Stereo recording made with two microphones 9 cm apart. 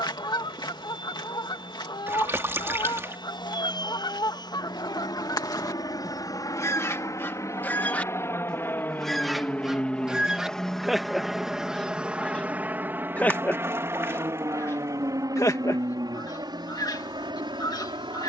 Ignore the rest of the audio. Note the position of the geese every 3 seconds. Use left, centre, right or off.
left, left, left, centre, left, left.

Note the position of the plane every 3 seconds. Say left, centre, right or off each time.
left, left, left, centre, right, right.